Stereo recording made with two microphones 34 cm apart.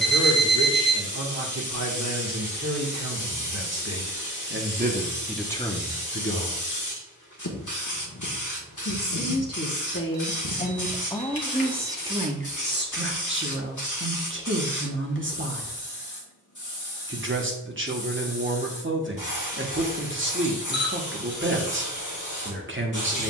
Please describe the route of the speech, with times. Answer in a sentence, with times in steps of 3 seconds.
In this clip you hear the speech on the right from 0 s, on the left from 6 s and on the right from 12 s.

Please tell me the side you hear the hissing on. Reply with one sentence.
You can hear the hissing on the left.